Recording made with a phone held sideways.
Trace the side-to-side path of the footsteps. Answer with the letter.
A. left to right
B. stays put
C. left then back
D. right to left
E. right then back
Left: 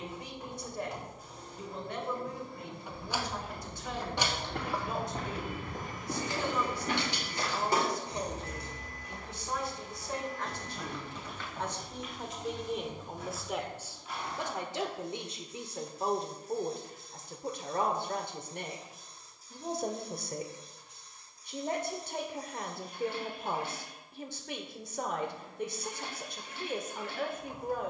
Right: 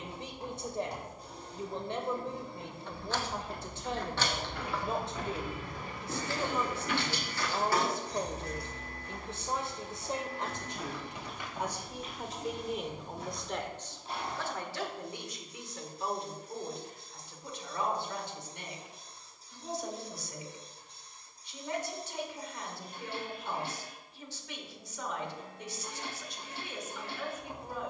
A.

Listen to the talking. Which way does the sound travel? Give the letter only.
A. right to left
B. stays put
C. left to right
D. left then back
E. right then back
A.